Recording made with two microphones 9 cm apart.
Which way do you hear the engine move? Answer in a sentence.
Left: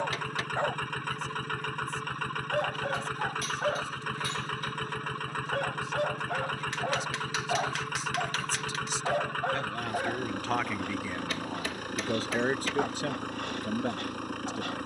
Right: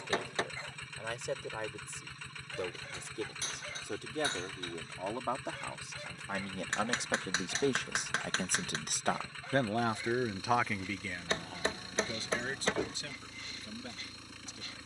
In this clip you hear the engine stay in one place.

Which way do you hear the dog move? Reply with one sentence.
You can hear the dog stay put.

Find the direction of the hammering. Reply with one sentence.
In this clip you hear the hammering on the right.